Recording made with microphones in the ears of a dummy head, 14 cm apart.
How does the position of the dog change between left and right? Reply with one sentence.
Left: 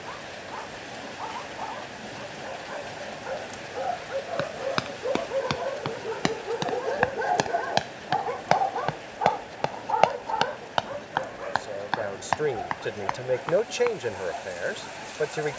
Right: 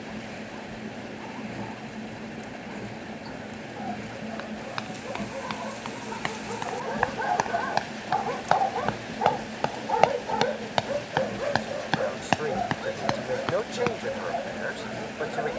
You can hear the dog travel towards the right.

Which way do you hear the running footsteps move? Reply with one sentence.
You can hear the running footsteps travel towards the right.